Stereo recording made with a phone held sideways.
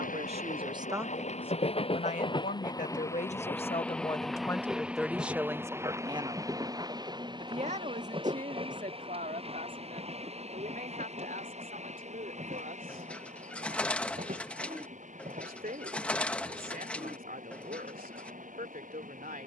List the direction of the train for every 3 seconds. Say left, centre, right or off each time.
left, centre, right, right, right, right, right.